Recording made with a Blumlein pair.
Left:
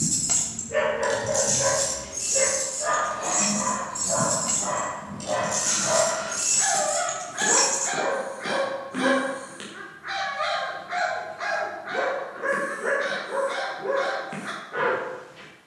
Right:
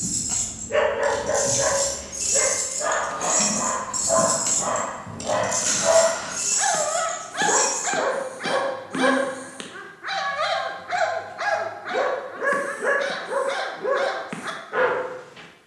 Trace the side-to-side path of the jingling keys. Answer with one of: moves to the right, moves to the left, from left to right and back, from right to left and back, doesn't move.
from left to right and back.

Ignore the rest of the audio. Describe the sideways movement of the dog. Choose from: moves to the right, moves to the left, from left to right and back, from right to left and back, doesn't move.
doesn't move.